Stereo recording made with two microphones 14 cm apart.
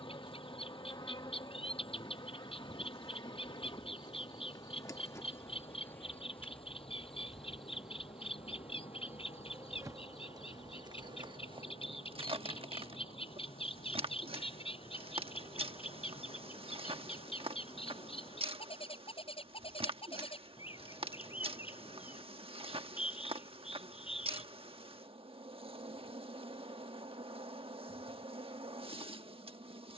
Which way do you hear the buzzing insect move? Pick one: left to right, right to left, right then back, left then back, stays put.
left to right.